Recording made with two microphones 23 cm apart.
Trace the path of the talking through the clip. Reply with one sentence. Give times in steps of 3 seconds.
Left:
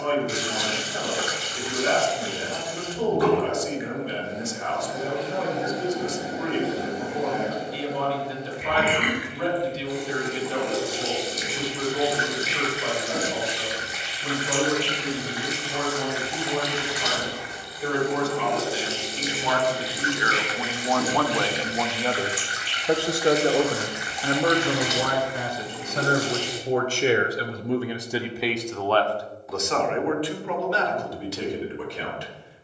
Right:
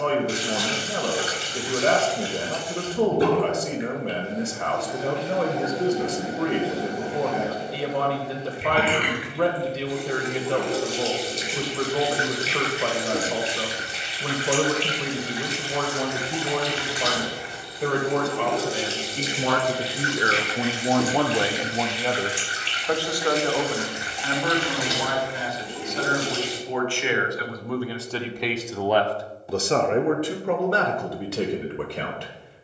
In this clip you hear the talking on the right from 0 s, in the centre from 21 s, on the left from 24 s, in the centre from 27 s and on the right from 30 s.